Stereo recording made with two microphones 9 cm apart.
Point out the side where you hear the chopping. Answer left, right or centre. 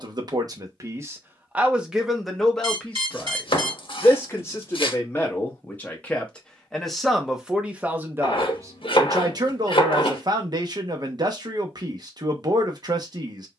left.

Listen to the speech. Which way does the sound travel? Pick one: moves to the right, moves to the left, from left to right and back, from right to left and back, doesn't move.
from right to left and back.